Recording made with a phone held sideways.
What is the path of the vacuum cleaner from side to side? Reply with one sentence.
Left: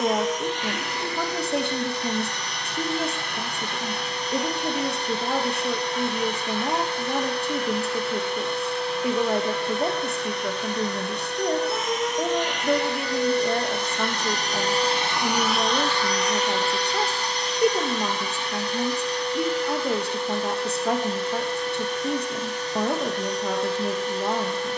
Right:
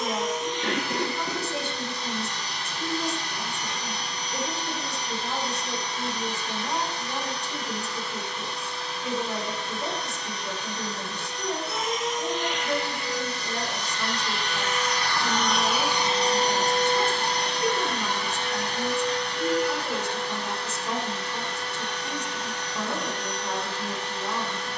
You can hear the vacuum cleaner go from the left side to the right.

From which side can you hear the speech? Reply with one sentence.
You can hear the speech on the left.